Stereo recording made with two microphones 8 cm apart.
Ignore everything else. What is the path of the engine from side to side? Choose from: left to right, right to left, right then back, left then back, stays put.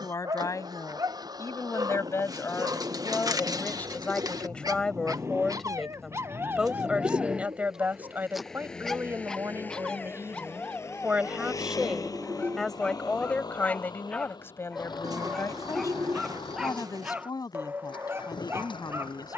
right to left.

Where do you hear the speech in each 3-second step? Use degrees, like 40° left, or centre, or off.
40° left, 10° left, 20° right, 20° right, 20° left, 40° left, 50° left.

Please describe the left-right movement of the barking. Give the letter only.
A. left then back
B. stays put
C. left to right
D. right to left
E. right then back
A.